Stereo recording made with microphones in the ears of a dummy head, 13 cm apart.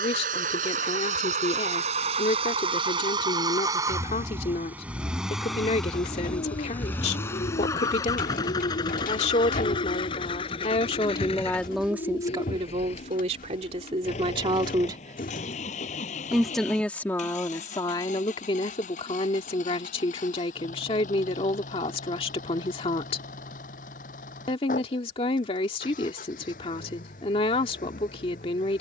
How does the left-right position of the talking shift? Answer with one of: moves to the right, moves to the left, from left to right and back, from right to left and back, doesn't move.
from left to right and back.